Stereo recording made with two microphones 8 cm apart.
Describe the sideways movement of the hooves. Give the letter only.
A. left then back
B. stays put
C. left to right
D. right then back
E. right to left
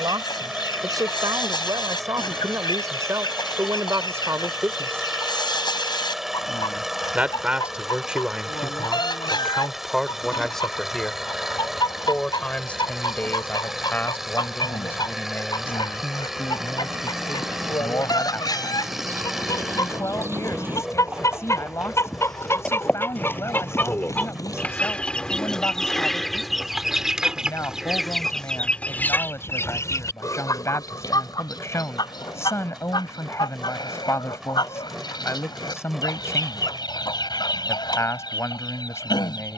E.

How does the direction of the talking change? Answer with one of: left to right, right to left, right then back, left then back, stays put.
right to left.